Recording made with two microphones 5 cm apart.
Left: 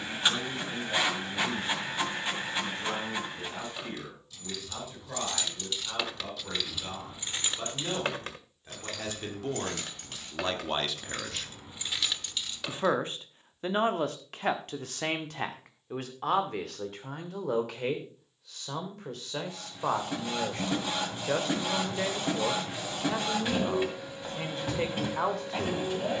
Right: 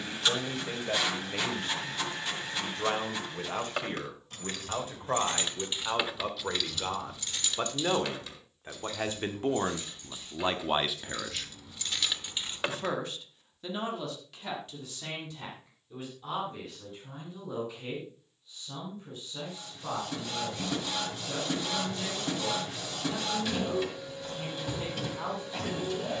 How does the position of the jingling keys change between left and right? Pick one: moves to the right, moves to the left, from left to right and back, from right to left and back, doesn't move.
from right to left and back.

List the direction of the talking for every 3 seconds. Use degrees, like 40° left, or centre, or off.
50° right, 50° right, 40° right, 20° right, 40° left, 70° left, 80° left, 80° left, 80° left.